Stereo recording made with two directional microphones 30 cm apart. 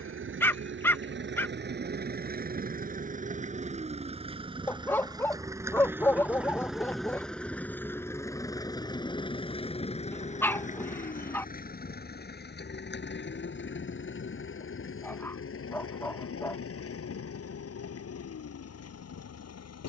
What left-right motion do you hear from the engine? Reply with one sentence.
In this clip you hear the engine go from the right side to the left.